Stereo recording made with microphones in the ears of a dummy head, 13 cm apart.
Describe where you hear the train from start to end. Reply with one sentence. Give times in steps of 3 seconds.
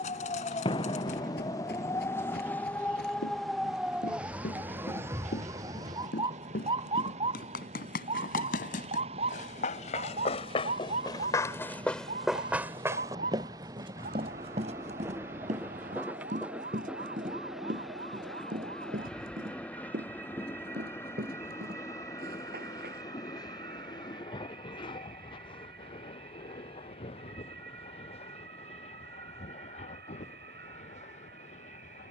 You can hear the train on the right from 0 s, in the centre from 15 s and on the left from 21 s.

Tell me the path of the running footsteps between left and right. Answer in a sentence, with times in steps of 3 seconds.
In this clip you hear the running footsteps on the left from 0 s, on the right from 12 s and not at all from 24 s.